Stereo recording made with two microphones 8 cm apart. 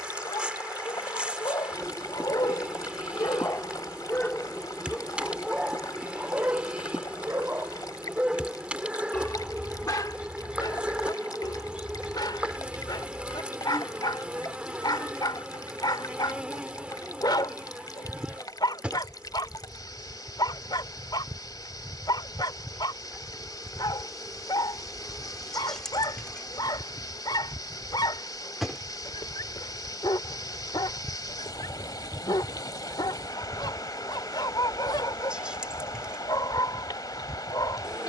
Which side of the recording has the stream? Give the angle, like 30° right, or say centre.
60° left.